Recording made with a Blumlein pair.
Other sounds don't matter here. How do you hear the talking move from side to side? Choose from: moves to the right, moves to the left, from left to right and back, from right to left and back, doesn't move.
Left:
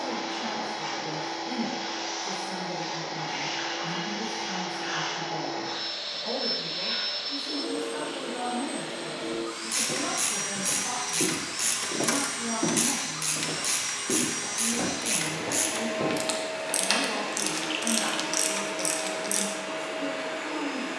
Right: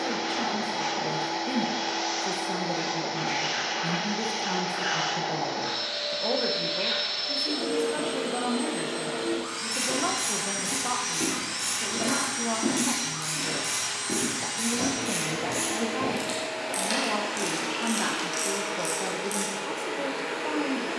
doesn't move.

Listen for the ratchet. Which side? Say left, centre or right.
left.